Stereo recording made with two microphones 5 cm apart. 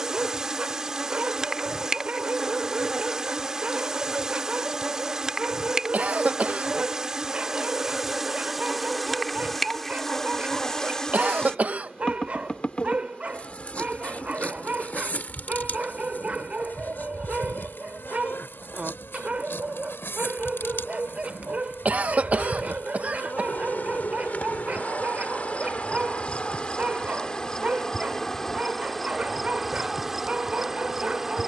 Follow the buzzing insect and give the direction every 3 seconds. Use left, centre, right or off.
centre, centre, centre, centre, left, left, left, left, left, centre, centre.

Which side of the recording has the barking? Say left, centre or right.
right.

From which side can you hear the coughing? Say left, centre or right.
right.